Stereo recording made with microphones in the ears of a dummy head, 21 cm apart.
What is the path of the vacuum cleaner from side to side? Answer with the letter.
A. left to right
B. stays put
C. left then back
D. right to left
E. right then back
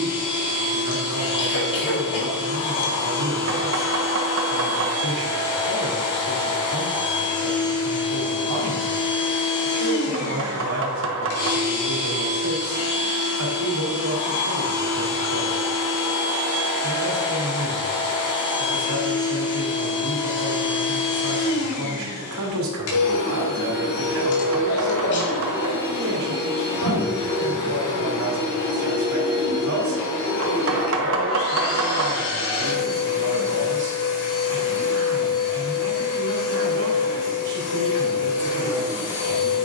B.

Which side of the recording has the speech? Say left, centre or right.
right.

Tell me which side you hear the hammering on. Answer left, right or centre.
right.